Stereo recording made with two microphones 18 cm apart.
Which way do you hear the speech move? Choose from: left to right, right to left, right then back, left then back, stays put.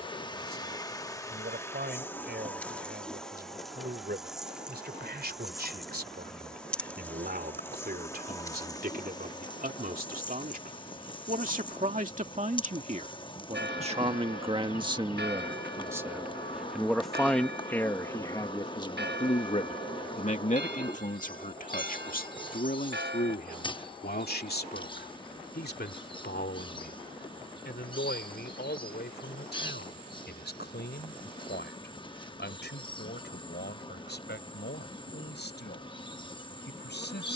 right to left.